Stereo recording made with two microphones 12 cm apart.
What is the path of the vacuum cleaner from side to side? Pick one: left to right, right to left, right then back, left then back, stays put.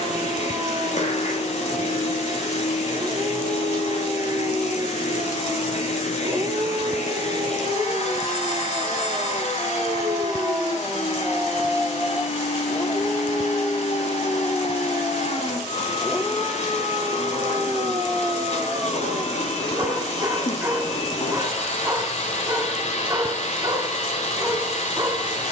stays put.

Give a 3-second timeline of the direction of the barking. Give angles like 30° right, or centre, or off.
30° right, 30° right, 30° right, 20° right, 30° left, centre, 20° right, 20° right, 20° right.